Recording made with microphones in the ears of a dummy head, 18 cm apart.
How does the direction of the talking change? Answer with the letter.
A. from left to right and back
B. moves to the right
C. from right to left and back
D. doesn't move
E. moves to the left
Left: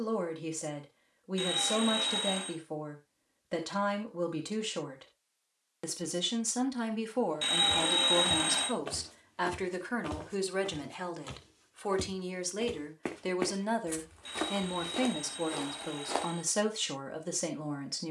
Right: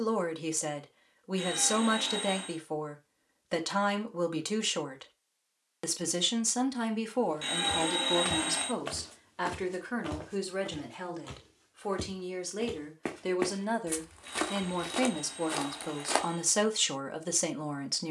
C.